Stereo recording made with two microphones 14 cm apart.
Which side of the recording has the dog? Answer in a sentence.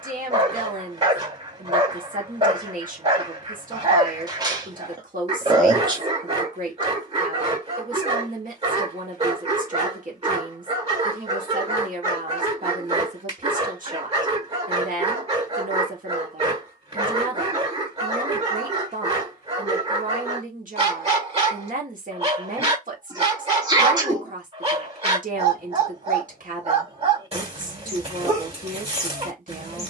You can hear the dog on the right.